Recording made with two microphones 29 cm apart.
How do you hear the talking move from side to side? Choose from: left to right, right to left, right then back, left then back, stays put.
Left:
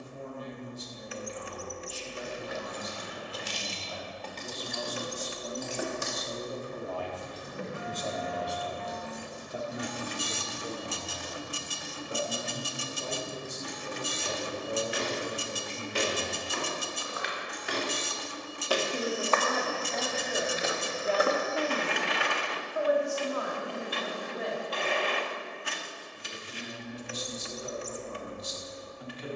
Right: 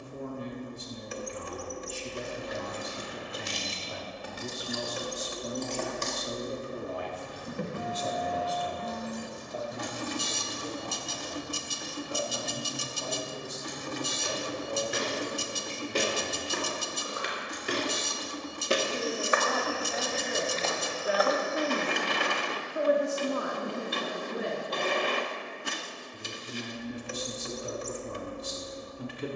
left then back.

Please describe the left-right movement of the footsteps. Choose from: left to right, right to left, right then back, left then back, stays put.
right to left.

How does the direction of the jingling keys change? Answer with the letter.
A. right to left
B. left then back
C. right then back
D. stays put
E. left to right
A.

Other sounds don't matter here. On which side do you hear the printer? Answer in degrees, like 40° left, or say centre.
50° right.